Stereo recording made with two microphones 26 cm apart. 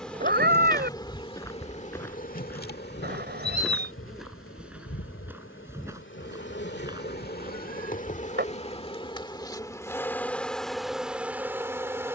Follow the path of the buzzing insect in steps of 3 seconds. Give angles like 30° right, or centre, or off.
20° left, 50° left, 40° left, centre.